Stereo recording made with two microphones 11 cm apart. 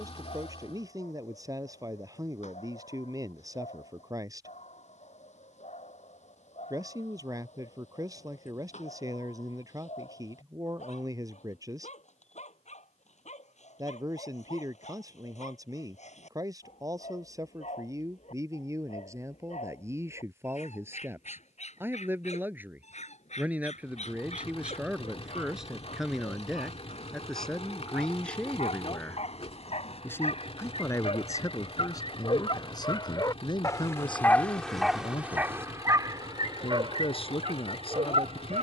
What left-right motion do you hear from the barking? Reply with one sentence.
You can hear the barking move to the right.